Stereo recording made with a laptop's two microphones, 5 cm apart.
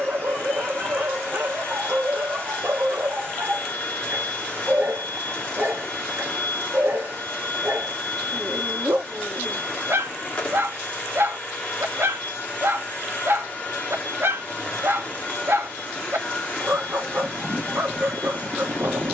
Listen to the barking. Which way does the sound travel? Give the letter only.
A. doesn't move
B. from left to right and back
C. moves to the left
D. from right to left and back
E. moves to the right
A.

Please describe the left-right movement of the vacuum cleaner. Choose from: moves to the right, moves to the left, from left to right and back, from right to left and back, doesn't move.
doesn't move.